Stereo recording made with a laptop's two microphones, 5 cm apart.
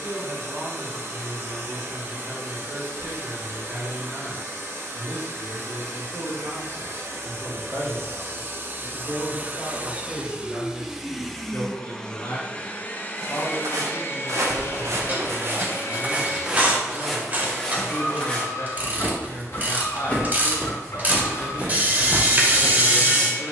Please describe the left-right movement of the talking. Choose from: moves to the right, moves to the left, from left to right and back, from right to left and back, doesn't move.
moves to the left.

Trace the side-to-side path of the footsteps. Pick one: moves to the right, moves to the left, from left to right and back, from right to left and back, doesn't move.
from right to left and back.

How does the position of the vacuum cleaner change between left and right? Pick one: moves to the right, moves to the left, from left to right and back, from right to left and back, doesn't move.
moves to the left.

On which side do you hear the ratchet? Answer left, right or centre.
right.